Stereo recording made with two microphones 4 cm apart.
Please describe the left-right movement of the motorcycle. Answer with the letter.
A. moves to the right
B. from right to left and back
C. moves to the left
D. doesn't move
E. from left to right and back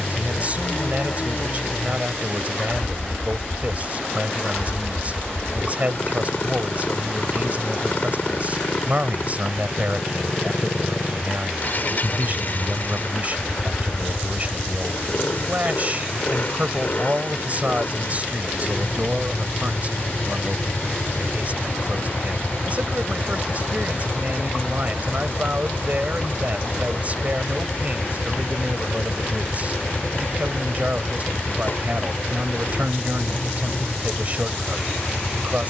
D.